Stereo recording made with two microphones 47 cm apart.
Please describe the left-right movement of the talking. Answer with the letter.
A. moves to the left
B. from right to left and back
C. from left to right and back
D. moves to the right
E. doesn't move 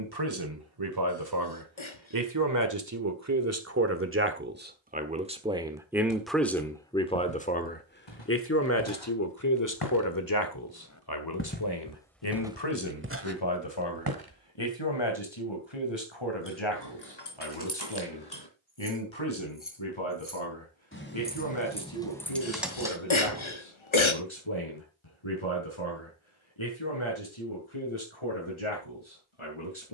A.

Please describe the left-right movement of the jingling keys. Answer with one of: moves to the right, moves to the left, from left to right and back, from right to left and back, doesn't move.
moves to the right.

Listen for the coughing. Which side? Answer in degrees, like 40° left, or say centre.
80° left.